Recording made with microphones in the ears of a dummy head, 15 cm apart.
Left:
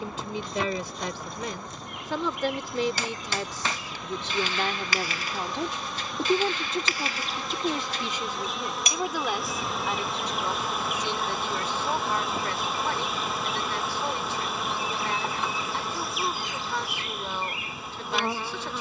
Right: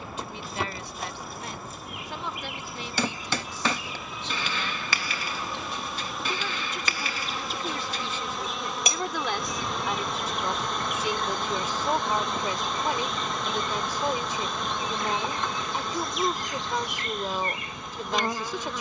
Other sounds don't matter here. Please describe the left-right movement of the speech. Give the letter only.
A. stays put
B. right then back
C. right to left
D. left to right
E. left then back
D.